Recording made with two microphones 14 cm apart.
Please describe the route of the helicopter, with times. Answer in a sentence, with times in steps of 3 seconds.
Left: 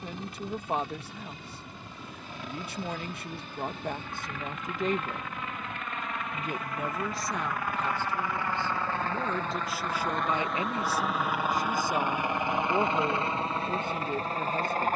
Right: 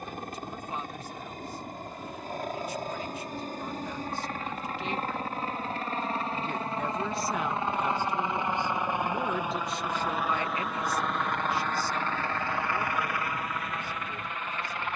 You can hear the helicopter on the right from 0 s, in the centre from 9 s and on the left from 12 s.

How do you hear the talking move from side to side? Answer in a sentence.
You can hear the talking go right and come back.